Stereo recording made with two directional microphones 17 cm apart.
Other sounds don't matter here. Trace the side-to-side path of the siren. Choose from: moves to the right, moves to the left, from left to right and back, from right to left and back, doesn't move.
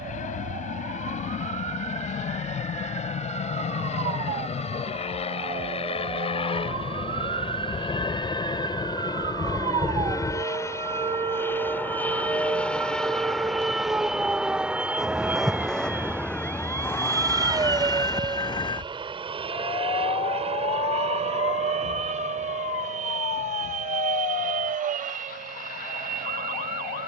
moves to the left.